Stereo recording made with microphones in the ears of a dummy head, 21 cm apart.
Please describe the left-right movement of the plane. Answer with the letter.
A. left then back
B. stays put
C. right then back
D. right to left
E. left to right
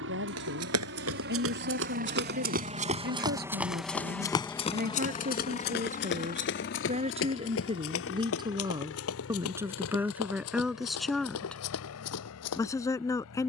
D.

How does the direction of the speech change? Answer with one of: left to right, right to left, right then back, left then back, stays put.
right to left.